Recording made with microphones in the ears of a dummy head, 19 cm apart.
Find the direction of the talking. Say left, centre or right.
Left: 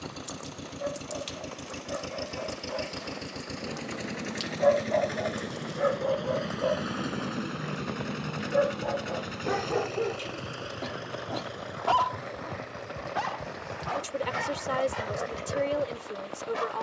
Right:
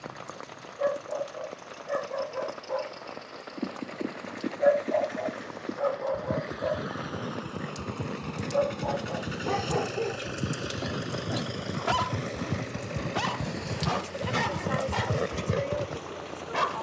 left.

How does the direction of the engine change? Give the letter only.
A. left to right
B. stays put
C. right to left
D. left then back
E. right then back
A.